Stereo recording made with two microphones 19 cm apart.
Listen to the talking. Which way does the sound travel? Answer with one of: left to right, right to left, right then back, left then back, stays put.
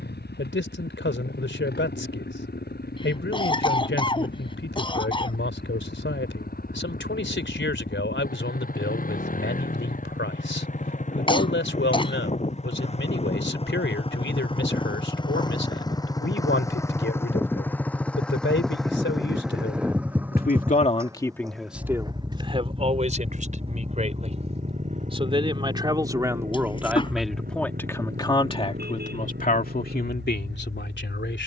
right then back.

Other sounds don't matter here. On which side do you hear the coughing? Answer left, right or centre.
left.